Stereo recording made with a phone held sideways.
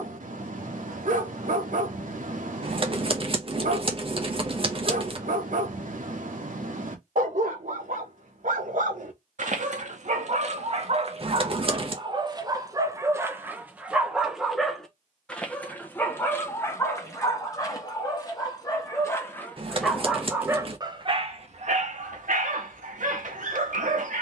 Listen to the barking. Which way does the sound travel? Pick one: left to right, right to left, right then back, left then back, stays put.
left then back.